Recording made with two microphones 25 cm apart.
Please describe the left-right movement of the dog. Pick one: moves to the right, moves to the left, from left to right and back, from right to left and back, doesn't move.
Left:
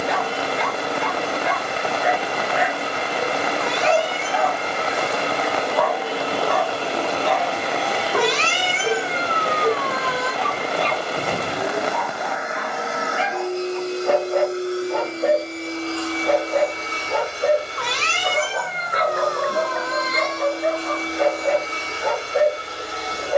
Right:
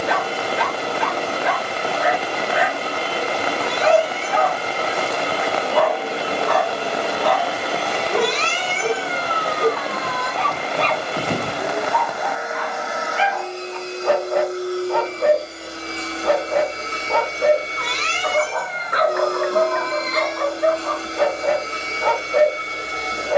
doesn't move.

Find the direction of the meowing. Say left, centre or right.
left.